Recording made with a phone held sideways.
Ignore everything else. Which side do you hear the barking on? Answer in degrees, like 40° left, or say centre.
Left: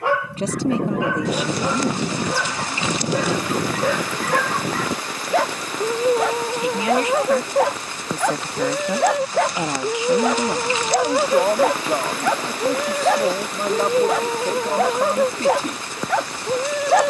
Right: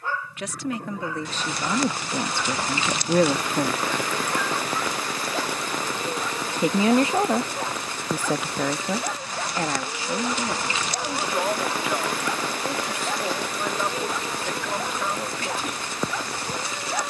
70° left.